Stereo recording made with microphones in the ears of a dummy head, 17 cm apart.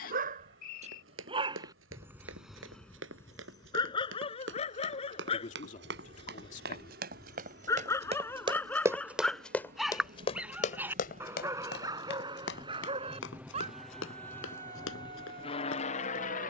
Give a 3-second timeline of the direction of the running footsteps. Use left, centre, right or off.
right, right, right, left, left, left.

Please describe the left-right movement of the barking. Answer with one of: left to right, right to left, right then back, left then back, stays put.
left then back.